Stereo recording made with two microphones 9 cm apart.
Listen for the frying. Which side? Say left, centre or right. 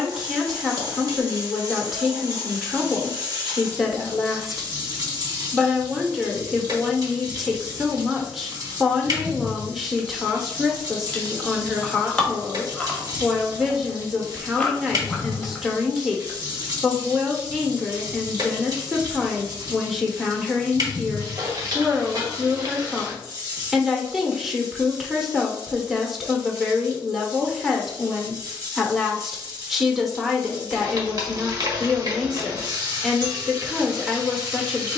right.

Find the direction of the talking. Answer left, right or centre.
centre.